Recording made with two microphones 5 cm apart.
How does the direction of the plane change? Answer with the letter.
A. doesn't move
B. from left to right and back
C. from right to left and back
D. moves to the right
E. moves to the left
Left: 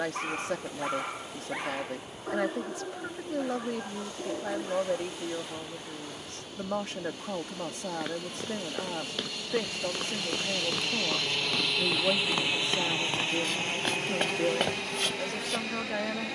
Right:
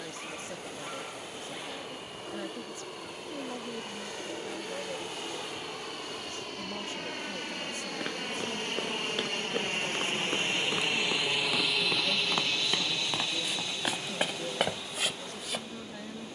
E.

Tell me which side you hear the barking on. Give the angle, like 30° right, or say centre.
50° left.